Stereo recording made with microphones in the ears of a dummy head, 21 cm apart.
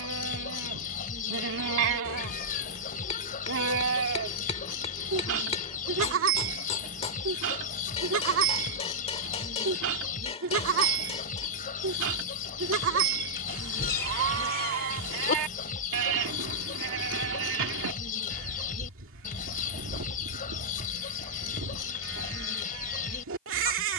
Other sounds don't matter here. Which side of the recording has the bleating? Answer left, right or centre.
right.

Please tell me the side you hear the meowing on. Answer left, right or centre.
left.